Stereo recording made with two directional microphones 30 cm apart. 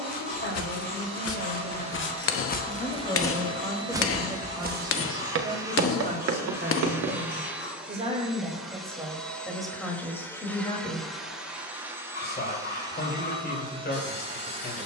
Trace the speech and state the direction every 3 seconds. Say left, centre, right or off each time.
left, centre, right, centre, left.